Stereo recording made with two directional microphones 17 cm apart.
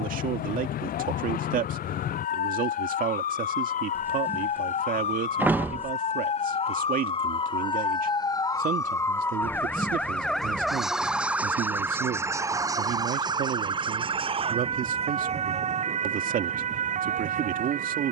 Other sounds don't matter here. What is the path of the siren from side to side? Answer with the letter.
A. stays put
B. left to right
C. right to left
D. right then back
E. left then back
B.